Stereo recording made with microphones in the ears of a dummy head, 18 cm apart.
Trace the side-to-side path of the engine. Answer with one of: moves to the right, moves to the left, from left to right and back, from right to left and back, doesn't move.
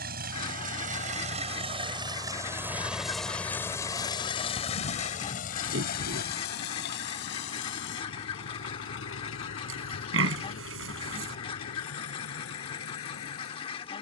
moves to the left.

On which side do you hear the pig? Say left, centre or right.
right.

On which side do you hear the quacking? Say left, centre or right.
left.